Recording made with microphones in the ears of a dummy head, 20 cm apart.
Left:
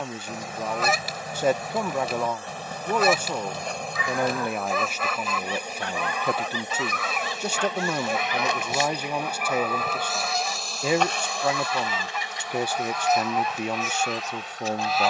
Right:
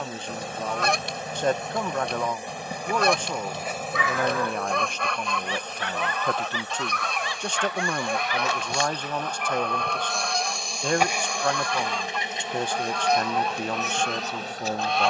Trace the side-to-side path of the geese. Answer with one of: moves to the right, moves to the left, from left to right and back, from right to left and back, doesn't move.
doesn't move.